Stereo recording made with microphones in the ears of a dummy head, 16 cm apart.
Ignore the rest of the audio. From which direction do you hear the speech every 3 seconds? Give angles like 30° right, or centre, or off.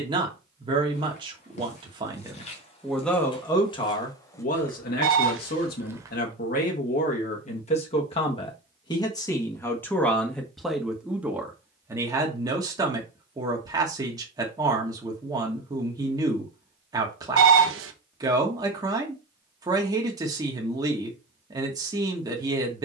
20° right, 40° left, 40° left, centre, 20° right, 20° right, 20° right, 20° right.